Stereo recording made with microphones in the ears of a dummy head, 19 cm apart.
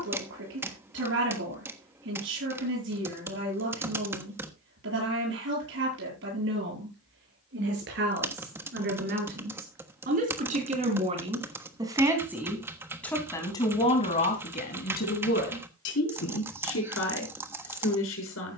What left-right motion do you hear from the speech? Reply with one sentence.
In this clip you hear the speech go from the right side to the left.